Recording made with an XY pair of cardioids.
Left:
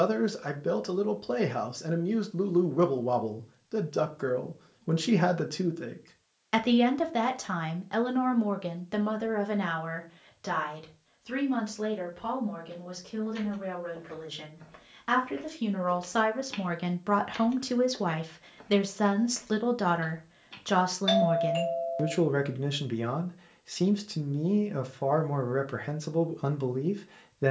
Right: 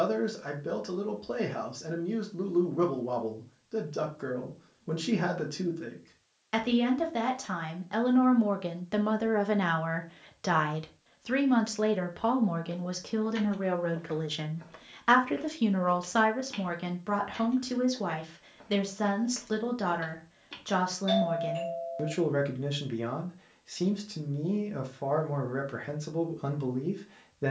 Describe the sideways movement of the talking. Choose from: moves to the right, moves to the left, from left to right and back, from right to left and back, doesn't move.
from left to right and back.